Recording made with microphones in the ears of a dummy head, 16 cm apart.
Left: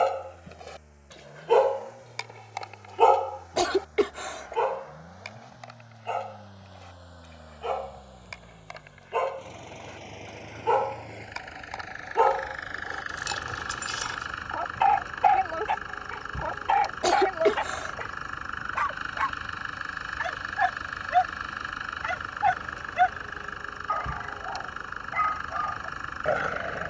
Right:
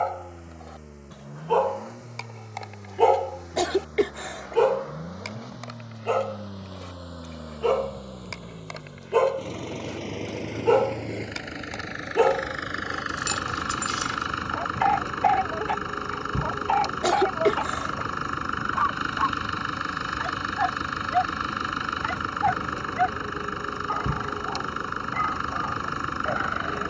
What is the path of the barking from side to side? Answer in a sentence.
You can hear the barking move from left to right and back again.